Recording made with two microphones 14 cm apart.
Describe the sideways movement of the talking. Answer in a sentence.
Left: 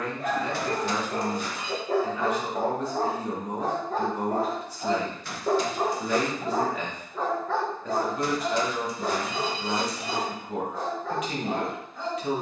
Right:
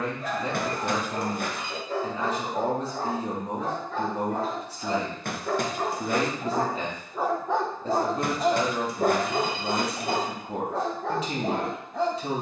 You can hear the talking stay put.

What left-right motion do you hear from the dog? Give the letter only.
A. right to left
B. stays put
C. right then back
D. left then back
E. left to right
E.